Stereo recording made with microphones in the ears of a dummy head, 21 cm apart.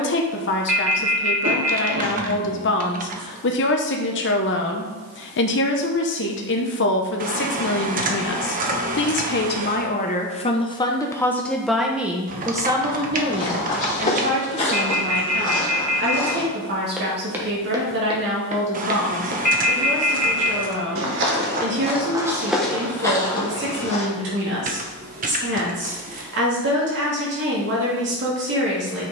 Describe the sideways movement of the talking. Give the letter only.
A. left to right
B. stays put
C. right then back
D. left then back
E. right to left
A.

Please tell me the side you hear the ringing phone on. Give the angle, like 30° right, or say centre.
30° left.